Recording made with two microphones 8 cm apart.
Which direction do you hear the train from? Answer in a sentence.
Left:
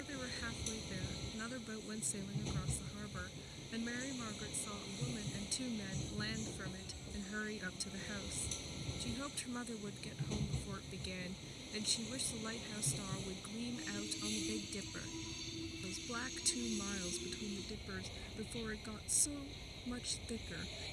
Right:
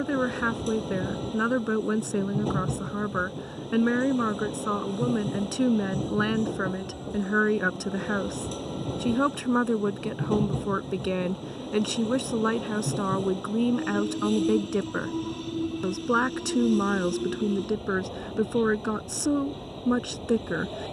You can hear the train on the right.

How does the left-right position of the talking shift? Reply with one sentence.
In this clip you hear the talking stay in one place.